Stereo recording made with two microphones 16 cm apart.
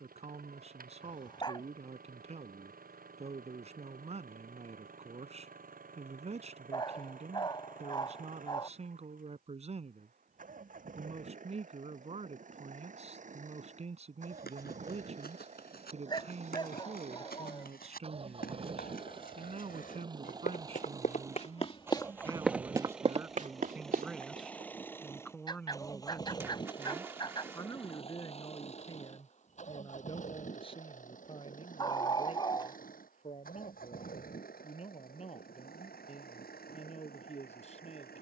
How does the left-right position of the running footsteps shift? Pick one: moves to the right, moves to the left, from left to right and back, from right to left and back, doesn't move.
moves to the right.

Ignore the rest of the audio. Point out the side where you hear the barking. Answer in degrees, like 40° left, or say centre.
30° left.